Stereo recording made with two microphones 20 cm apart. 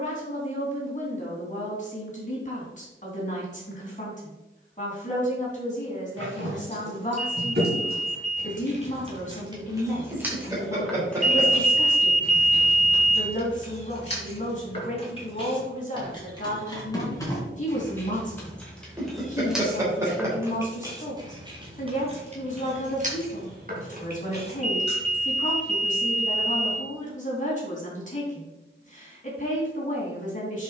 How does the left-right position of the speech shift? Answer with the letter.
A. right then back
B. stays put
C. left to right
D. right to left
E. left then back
B.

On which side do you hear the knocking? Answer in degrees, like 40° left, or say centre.
10° right.